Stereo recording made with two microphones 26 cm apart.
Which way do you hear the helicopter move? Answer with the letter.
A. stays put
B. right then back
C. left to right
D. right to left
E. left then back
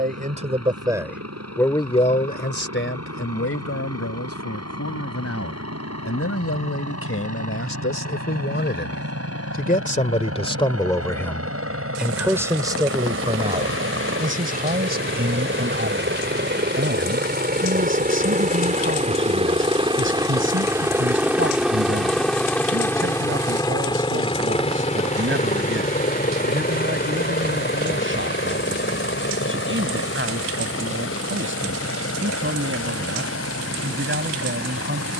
D.